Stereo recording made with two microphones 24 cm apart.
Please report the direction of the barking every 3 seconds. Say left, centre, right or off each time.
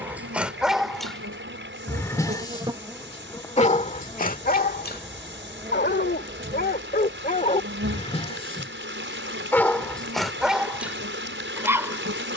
centre, left, left, centre.